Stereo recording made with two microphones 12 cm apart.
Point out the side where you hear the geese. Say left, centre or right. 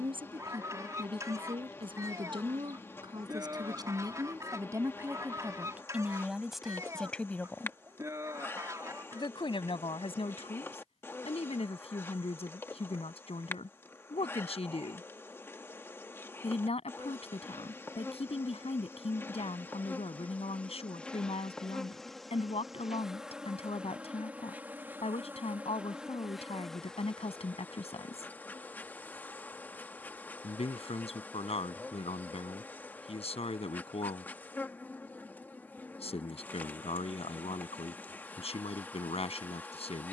right.